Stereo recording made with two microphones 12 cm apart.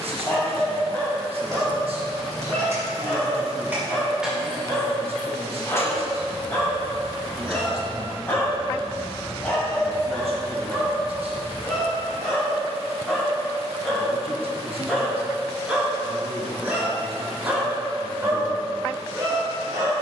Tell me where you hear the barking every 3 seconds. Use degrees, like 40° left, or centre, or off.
20° left, 20° left, 20° left, 10° left, centre, 10° right, 30° right.